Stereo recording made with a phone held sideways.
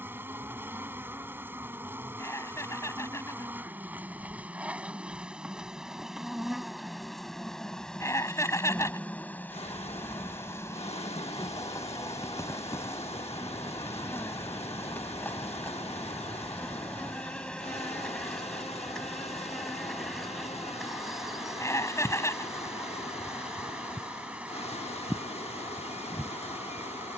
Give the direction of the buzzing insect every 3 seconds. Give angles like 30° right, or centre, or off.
20° right, 10° right, centre, 20° left, 20° left, 10° left, centre, 10° right, 10° right.